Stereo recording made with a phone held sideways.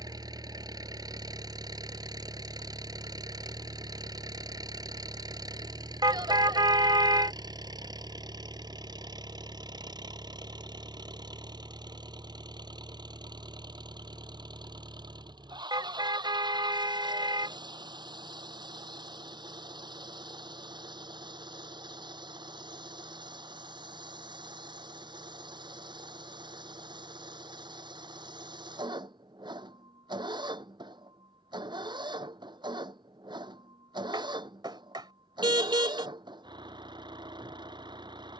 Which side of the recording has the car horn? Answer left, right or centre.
right.